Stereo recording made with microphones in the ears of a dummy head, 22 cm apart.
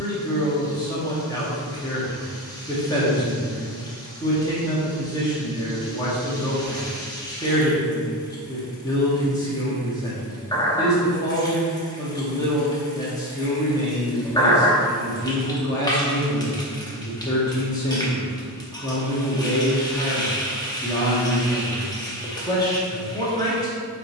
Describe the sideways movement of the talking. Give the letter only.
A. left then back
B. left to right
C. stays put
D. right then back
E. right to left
C.